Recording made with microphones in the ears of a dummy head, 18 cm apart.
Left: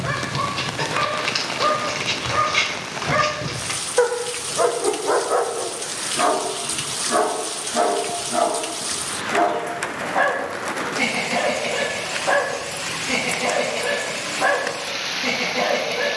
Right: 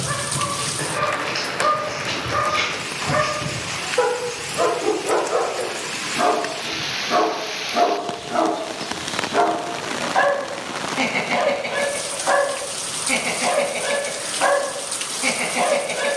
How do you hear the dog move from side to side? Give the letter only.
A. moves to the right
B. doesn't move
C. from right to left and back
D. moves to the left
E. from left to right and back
A.